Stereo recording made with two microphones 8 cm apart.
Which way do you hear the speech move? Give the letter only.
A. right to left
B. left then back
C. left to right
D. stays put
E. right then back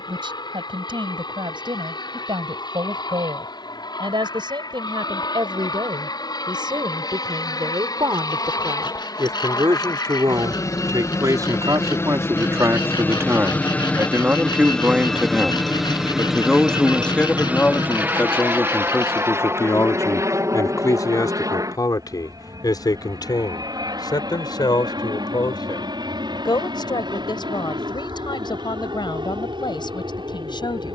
A.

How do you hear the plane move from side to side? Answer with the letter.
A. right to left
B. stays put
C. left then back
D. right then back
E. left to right
E.